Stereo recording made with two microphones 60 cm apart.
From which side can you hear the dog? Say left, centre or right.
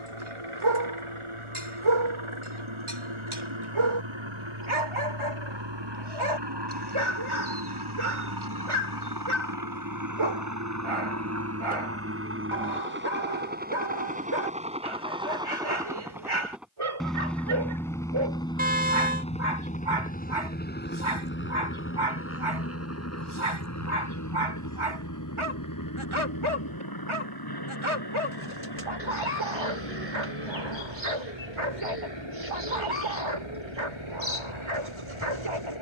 right.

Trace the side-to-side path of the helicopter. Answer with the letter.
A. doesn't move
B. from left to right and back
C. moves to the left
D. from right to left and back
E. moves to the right
C.